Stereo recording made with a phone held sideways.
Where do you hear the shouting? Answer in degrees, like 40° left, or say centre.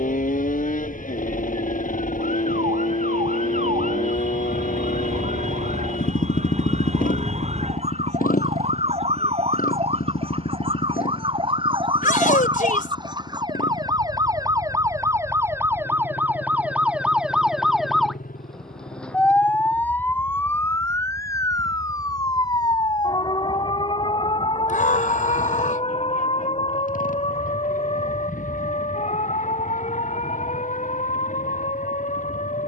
80° left.